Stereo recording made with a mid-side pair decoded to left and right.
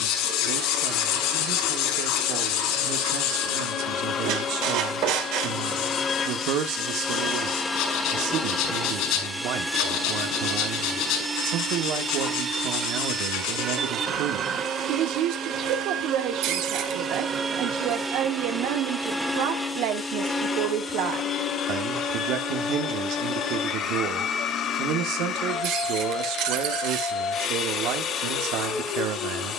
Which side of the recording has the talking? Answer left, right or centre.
right.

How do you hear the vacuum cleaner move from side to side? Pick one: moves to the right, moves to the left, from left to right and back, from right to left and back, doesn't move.
from left to right and back.